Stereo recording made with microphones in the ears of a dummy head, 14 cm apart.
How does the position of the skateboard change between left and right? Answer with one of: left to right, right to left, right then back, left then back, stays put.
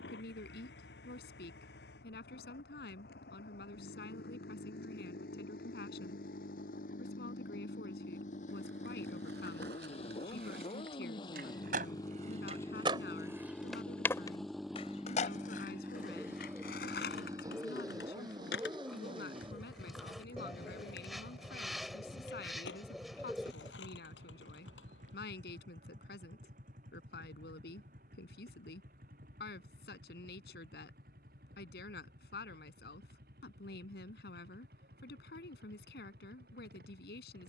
right to left.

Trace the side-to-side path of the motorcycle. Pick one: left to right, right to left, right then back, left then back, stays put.
left to right.